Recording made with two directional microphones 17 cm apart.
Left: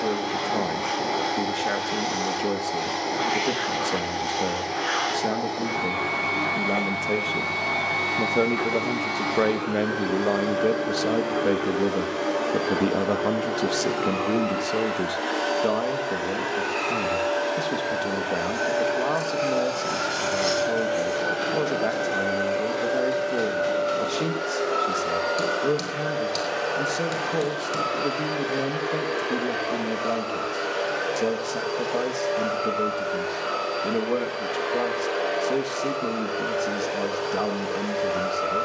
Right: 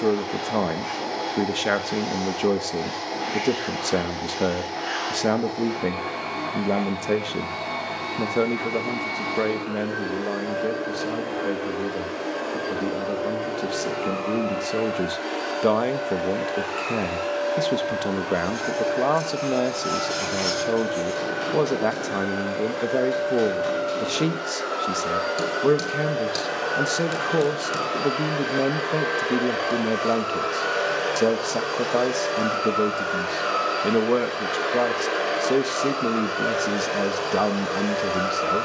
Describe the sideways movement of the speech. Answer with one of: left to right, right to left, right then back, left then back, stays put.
left then back.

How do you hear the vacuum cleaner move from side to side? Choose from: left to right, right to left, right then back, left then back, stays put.
left to right.